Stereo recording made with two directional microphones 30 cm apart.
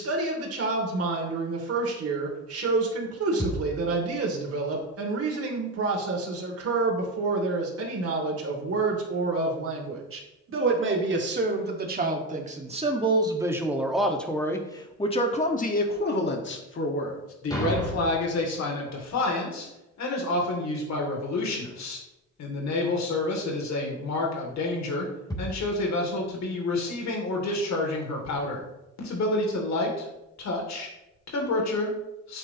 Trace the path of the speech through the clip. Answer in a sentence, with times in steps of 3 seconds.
You can hear the speech on the right from 0 s, in the centre from 12 s and on the left from 15 s.